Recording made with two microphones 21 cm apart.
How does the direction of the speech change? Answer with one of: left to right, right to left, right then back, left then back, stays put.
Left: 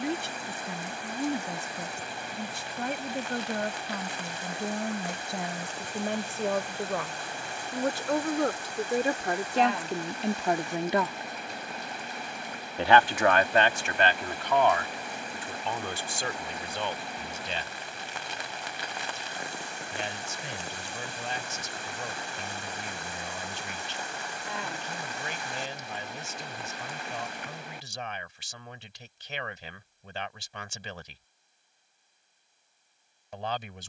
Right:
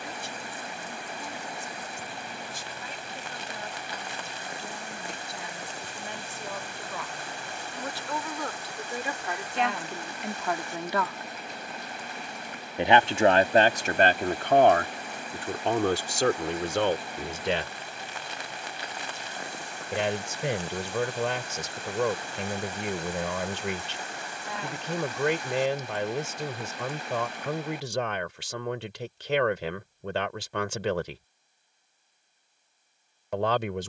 left to right.